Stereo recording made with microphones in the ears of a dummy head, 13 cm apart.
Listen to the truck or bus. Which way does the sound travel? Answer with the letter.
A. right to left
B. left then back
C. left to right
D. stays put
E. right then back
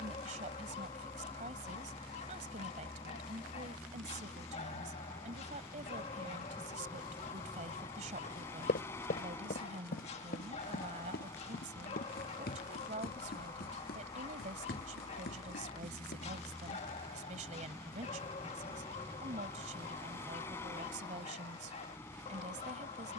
D.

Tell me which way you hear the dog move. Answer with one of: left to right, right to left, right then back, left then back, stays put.
stays put.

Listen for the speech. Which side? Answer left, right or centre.
right.